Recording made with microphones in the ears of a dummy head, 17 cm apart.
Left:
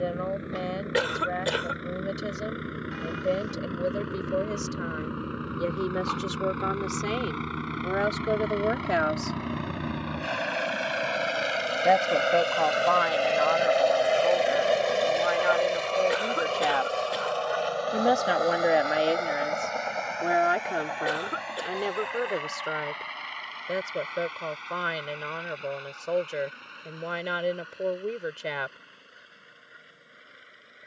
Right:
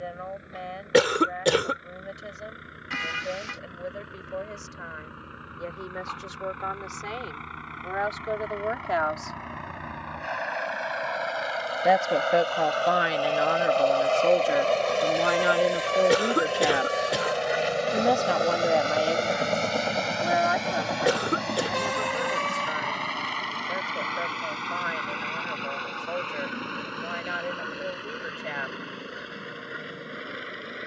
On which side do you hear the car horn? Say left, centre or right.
right.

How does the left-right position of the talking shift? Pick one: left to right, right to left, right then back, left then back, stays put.
right then back.